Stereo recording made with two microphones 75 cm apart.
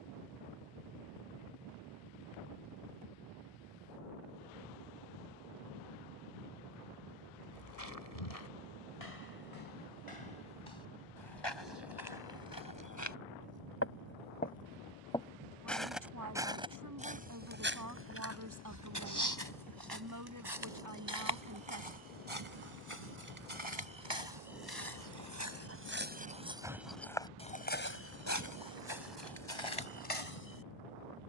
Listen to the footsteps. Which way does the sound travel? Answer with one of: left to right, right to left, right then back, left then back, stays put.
right then back.